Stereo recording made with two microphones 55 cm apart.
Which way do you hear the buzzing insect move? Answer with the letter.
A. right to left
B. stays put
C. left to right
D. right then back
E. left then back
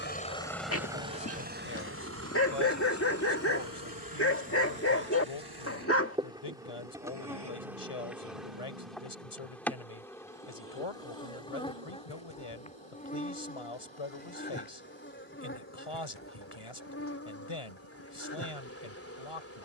A.